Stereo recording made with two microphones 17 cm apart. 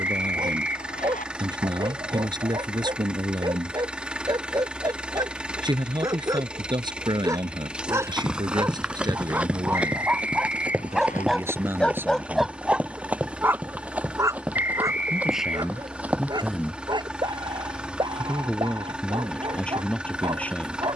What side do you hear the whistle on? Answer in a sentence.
In this clip you hear the whistle on the left.